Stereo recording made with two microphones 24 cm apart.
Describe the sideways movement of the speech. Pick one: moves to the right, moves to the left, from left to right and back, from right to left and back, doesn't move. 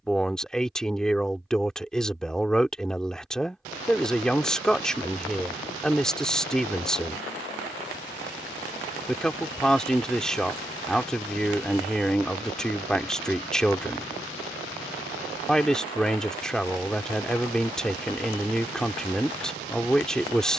doesn't move.